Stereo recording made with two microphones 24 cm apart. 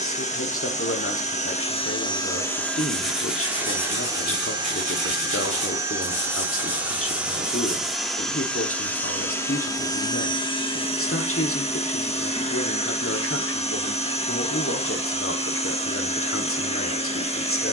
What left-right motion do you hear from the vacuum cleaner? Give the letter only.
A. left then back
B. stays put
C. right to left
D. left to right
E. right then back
E.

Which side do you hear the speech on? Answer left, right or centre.
left.